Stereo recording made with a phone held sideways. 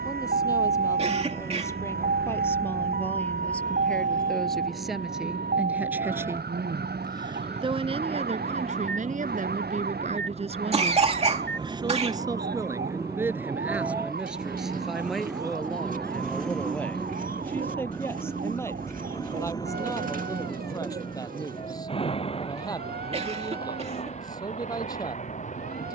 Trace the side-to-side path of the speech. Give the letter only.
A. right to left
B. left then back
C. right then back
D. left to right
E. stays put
C.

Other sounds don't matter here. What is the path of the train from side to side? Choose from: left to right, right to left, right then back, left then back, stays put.
right to left.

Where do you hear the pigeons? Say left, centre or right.
right.